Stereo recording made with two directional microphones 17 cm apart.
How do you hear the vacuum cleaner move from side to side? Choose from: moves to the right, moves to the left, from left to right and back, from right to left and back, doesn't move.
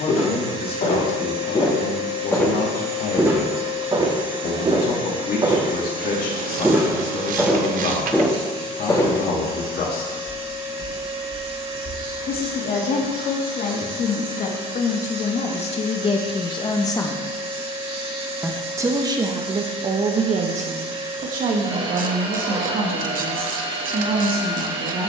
doesn't move.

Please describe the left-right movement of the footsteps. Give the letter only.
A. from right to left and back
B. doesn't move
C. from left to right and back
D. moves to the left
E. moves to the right
C.